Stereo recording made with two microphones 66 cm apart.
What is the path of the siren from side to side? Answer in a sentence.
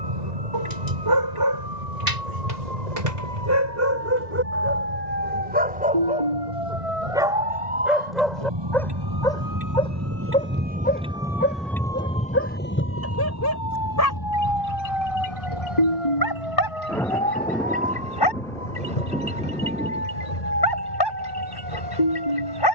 In this clip you hear the siren go from the right side to the left.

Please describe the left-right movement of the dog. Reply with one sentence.
In this clip you hear the dog go from the right side to the left.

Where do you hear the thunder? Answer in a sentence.
You can hear the thunder in the centre.